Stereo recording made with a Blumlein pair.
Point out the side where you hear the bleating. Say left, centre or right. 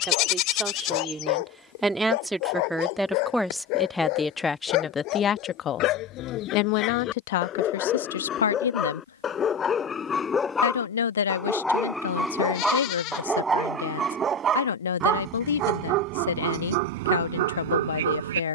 left.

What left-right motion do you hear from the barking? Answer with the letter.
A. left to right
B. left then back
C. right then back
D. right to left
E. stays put
A.